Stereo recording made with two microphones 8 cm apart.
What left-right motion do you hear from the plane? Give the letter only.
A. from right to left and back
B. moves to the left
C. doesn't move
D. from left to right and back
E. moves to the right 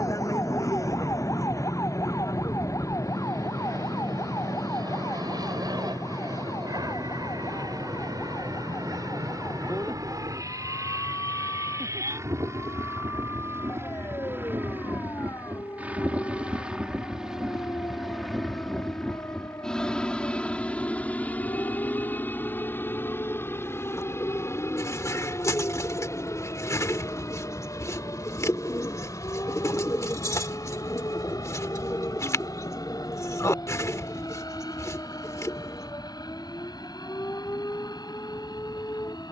B.